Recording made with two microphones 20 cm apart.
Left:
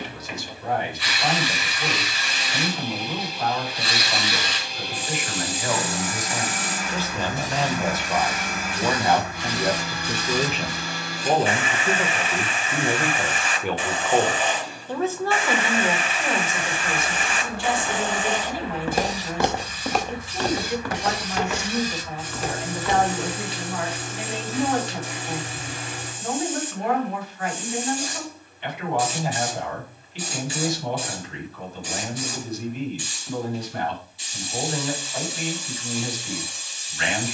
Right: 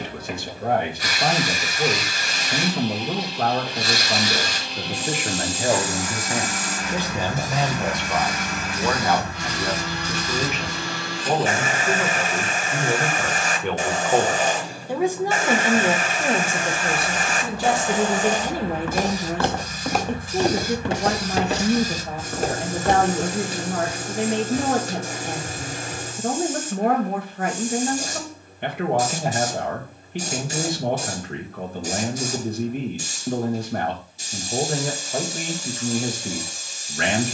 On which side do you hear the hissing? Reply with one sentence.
In this clip you hear the hissing on the right.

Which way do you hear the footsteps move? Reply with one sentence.
In this clip you hear the footsteps move to the right.